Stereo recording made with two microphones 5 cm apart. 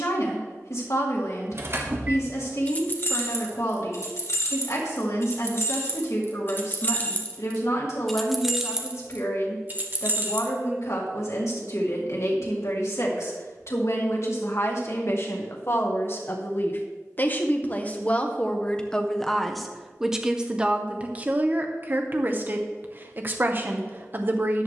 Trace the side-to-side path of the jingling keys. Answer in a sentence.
You can hear the jingling keys go left and come back.